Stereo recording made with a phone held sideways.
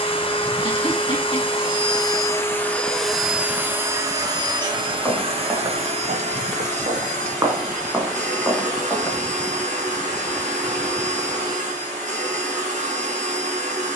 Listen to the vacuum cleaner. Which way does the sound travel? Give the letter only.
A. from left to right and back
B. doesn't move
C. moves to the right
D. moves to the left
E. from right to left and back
C.